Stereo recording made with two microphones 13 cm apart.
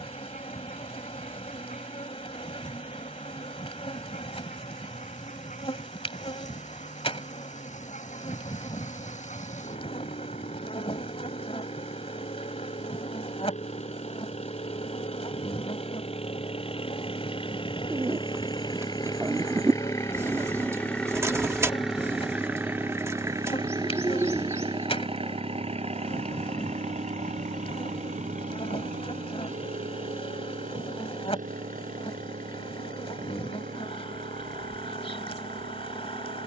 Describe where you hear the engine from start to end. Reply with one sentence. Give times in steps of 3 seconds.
You can hear the engine on the left from 0 s, in the centre from 21 s and on the right from 24 s.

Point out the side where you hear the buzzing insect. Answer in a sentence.
In this clip you hear the buzzing insect on the left.